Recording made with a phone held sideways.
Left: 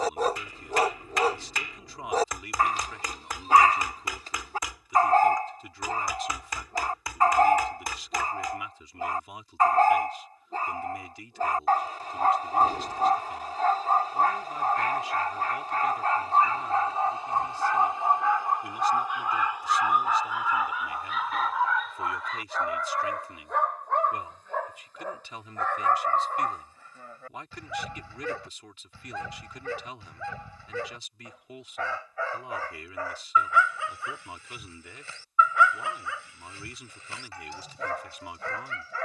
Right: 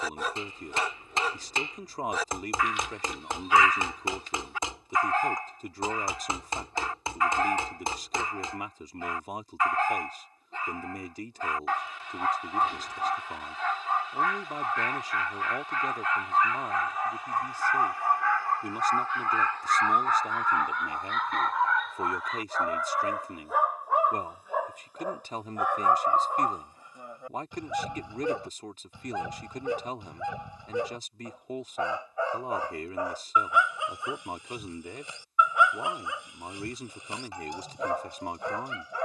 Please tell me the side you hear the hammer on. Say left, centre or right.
right.